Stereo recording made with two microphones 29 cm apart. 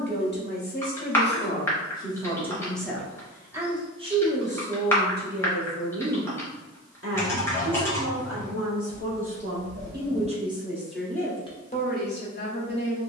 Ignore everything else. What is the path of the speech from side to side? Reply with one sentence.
In this clip you hear the speech move from left to right and back again.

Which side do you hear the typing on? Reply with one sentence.
In this clip you hear the typing in the centre.